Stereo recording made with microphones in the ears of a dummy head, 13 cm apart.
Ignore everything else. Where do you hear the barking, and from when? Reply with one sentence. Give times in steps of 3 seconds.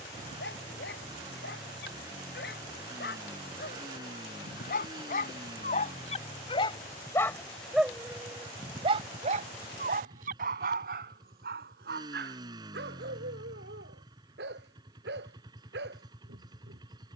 In this clip you hear the barking on the left from 0 s, in the centre from 6 s and on the right from 9 s.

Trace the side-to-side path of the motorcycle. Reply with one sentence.
In this clip you hear the motorcycle stay put.